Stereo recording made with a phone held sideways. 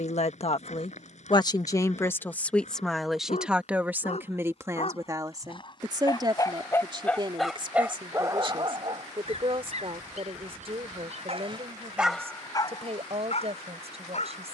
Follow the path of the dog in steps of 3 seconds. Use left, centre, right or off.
left, left, centre, right, left.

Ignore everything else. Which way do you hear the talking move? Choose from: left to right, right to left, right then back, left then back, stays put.
left to right.